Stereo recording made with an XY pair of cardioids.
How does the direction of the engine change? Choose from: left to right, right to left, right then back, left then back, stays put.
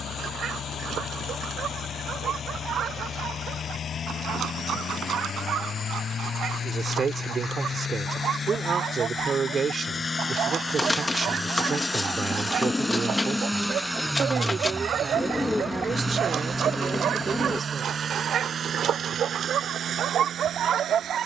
left to right.